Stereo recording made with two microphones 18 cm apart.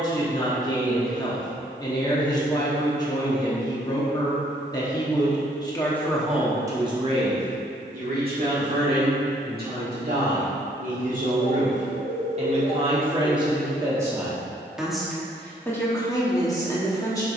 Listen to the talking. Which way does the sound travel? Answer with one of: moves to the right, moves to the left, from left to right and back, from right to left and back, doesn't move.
from left to right and back.